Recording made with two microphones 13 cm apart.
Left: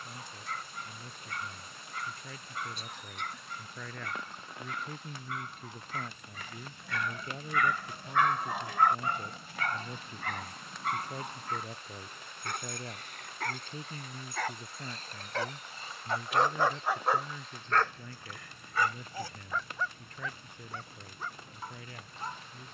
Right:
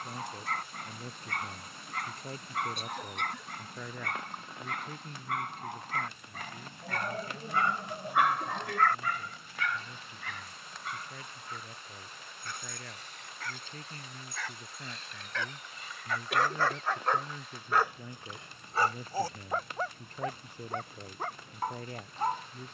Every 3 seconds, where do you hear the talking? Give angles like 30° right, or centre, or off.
40° right, centre, 40° left, 40° left, 20° left, 10° right, 30° right, 40° right.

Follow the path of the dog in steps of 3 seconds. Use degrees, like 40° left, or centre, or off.
70° right, 70° right, 30° right, 50° left, 60° left, 20° left, 40° right, 60° right.